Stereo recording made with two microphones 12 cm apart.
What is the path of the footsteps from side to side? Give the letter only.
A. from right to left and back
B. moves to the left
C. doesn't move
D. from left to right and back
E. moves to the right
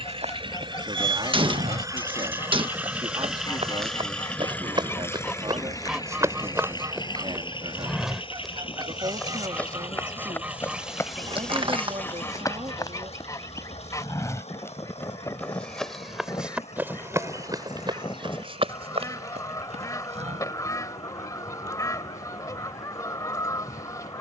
A.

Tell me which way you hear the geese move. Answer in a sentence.
In this clip you hear the geese move from left to right and back again.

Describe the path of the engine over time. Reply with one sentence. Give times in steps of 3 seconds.
In this clip you hear the engine on the right from 0 s, in the centre from 3 s and on the left from 6 s.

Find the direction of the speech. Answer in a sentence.
You can hear the speech on the right.